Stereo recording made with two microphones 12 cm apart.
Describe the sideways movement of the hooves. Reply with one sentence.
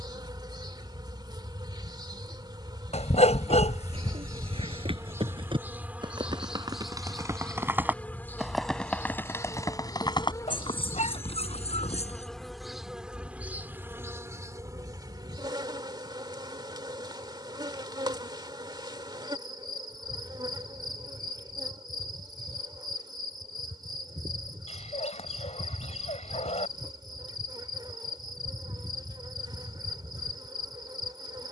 In this clip you hear the hooves go from the right side to the left.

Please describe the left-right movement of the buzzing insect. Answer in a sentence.
In this clip you hear the buzzing insect go left and come back.